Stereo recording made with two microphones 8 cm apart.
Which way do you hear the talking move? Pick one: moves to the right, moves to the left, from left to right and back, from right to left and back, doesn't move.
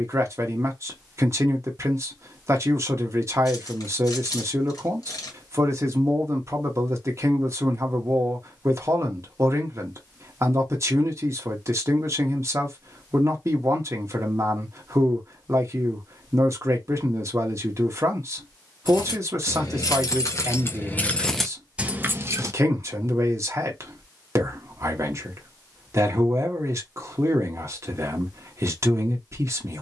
doesn't move.